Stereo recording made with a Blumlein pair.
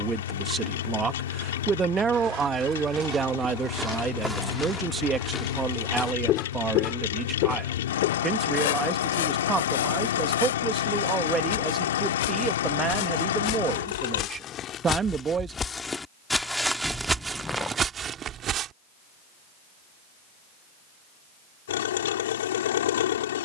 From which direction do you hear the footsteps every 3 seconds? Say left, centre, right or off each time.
right, centre, left, left, left, centre, right, off.